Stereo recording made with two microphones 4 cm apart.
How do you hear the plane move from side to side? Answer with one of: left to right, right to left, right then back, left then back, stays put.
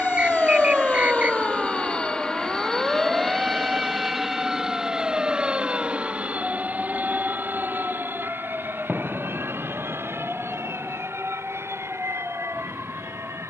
left to right.